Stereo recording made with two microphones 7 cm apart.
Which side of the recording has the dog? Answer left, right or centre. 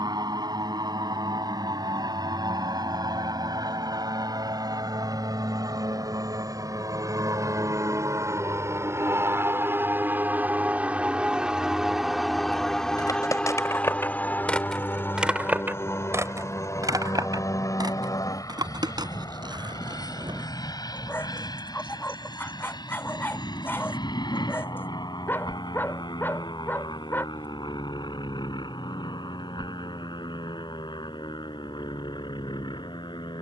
left.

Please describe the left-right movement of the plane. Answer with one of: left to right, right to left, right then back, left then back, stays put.
right to left.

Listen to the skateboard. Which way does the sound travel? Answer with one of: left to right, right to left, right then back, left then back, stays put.
left to right.